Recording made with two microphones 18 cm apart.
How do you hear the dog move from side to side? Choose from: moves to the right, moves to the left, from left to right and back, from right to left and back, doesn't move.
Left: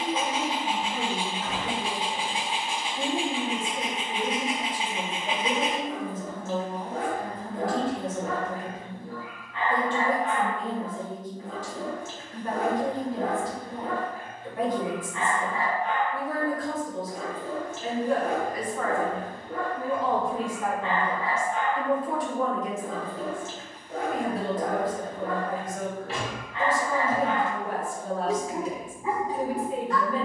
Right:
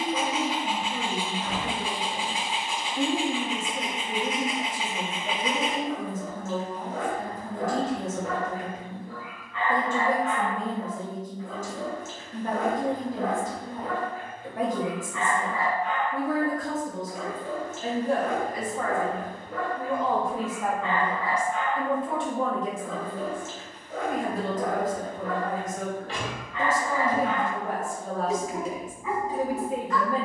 doesn't move.